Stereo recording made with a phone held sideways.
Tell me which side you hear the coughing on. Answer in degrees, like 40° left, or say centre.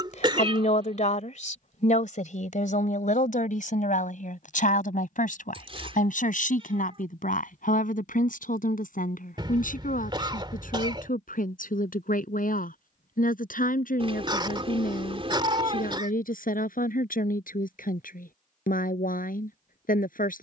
30° right.